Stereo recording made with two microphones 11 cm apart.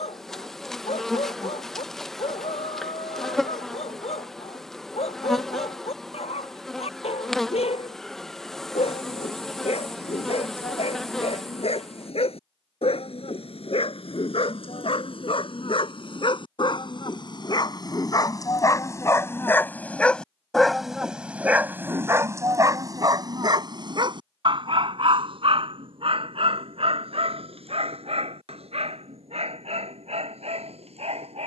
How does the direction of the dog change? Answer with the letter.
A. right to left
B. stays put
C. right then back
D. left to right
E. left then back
D.